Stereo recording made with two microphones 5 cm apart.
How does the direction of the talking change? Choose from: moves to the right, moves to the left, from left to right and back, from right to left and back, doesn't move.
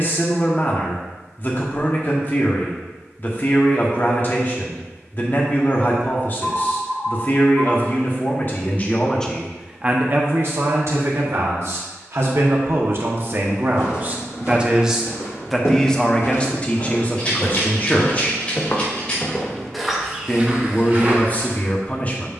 from left to right and back.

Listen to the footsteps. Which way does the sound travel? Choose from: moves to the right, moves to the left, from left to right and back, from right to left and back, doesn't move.
moves to the right.